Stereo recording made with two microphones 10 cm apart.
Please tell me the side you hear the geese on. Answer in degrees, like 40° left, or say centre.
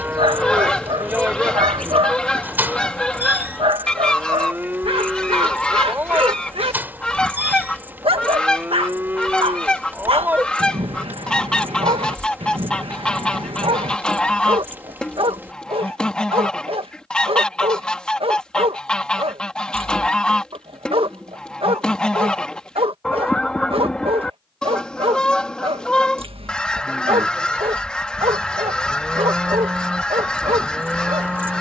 10° left.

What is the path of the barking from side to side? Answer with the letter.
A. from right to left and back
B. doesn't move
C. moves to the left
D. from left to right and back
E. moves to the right
B.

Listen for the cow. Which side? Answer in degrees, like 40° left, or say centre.
20° right.